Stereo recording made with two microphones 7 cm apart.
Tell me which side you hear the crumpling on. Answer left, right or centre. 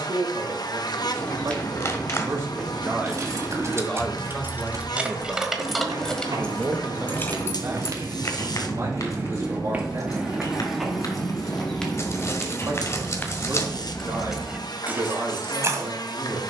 left.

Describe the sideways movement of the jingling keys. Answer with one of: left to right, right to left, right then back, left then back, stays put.
left then back.